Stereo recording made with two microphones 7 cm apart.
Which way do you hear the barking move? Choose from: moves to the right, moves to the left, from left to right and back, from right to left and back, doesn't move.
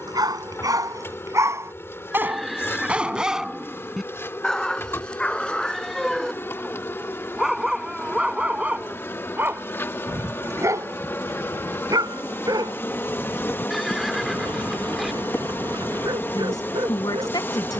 from right to left and back.